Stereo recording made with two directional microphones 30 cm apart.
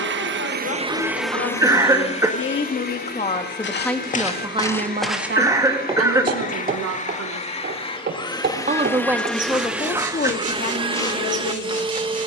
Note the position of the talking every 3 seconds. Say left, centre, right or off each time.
left, centre, right, left.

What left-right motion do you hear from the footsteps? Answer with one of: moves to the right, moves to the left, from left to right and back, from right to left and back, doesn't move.
from left to right and back.